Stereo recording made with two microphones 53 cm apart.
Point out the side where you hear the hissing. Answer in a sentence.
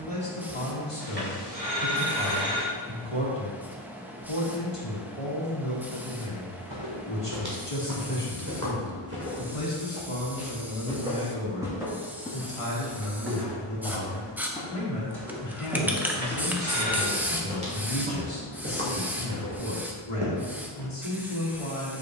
You can hear the hissing in the centre.